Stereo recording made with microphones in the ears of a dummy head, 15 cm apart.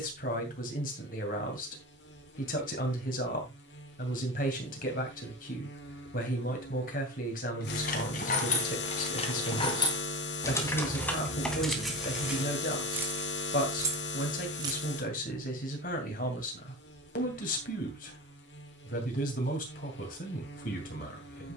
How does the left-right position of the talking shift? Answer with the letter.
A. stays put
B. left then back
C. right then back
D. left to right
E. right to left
A.